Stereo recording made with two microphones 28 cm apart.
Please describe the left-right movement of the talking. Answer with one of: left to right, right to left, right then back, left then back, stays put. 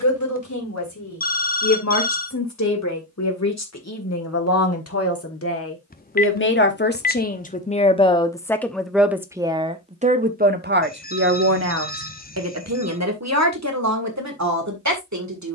left to right.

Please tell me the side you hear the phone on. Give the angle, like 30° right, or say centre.
30° left.